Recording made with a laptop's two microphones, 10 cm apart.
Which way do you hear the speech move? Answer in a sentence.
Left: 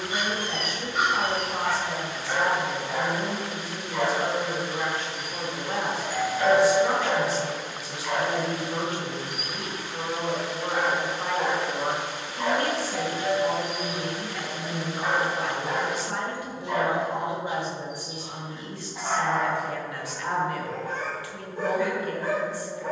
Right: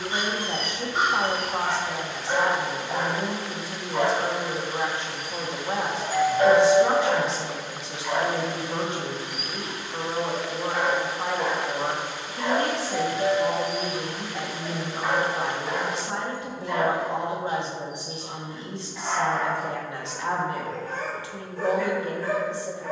You can hear the speech stay in one place.